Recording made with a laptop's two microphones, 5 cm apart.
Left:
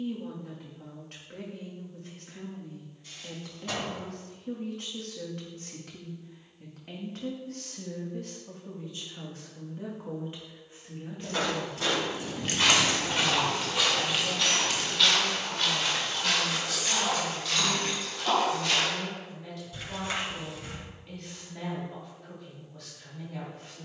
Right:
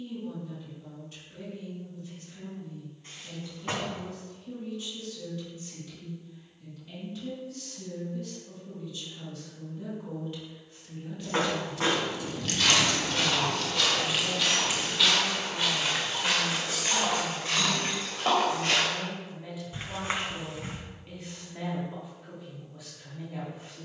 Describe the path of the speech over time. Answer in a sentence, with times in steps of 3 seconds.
In this clip you hear the speech on the left from 0 s and in the centre from 12 s.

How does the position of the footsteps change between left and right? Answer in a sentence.
You can hear the footsteps move to the right.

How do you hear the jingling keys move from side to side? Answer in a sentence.
In this clip you hear the jingling keys go from the left side to the right.